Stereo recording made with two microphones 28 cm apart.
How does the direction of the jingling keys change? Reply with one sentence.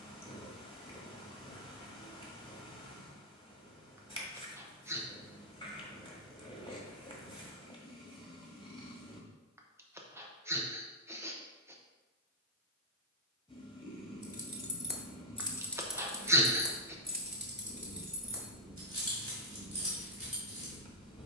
In this clip you hear the jingling keys move from left to right.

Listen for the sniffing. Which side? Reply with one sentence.
In this clip you hear the sniffing in the centre.